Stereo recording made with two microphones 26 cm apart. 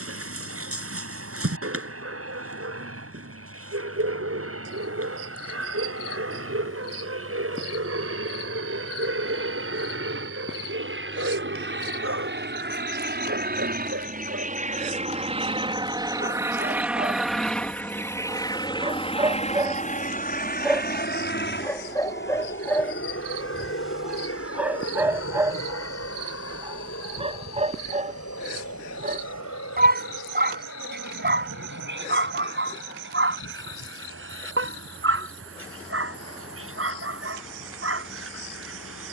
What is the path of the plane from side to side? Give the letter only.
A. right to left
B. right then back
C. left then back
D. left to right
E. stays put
A.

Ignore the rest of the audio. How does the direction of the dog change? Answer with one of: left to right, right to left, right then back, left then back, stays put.
left then back.